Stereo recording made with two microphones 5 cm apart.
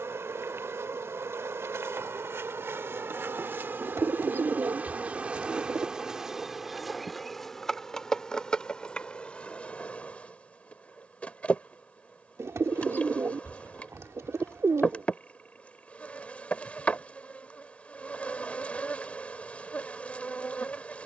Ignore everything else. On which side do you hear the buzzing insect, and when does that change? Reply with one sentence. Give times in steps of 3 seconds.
You can hear the buzzing insect on the right from 0 s, in the centre from 6 s and on the left from 9 s.